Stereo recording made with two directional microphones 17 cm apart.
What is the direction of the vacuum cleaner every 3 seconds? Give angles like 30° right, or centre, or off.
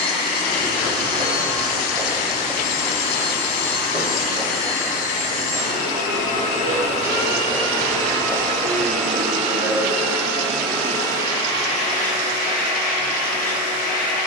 60° left, 50° left, 30° left, 10° left, 50° left.